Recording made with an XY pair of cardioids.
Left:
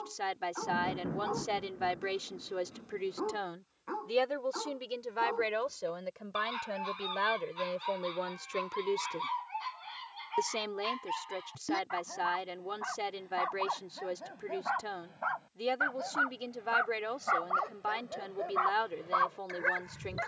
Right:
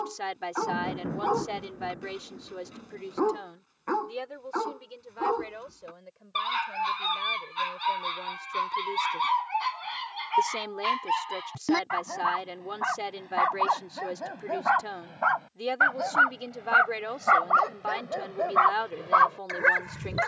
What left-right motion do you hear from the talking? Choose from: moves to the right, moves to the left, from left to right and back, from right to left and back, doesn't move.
from right to left and back.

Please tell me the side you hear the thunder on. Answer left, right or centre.
right.